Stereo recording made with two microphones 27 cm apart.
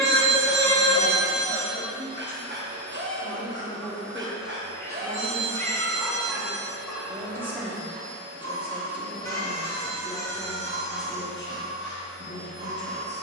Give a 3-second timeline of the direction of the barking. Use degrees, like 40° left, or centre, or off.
40° right, 40° right, 10° left, 40° left, 50° left.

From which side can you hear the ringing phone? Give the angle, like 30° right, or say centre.
50° right.